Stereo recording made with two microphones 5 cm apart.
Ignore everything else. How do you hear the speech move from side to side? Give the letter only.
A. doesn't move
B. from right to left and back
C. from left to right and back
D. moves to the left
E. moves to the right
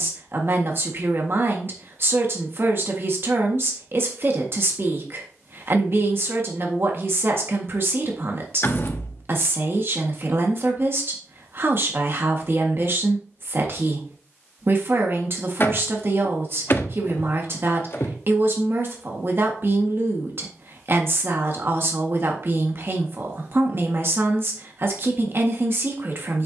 A.